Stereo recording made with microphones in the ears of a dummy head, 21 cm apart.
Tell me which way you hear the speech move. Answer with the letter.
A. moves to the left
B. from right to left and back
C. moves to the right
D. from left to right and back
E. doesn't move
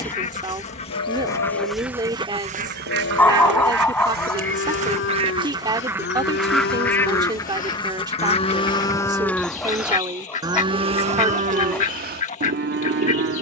E.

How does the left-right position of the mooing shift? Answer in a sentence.
You can hear the mooing travel towards the right.